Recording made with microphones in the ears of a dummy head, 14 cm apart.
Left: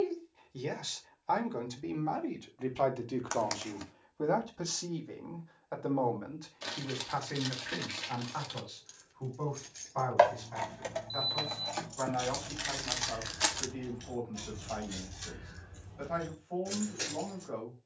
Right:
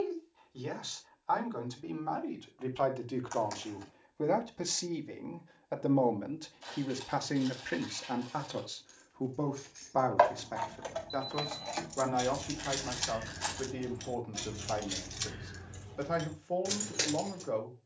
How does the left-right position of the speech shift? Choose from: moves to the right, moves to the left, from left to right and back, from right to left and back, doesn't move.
moves to the right.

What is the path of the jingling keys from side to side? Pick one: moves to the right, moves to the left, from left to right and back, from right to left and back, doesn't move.
moves to the right.